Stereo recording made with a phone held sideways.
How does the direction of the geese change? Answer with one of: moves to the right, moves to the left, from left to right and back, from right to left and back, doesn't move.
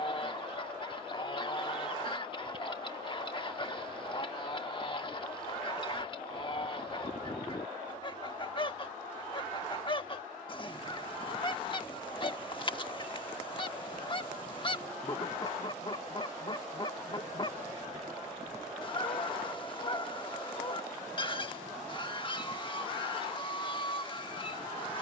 doesn't move.